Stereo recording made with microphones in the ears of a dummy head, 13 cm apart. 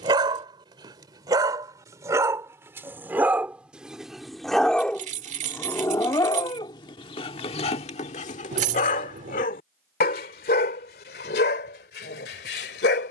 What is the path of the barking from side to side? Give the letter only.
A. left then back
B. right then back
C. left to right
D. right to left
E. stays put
D.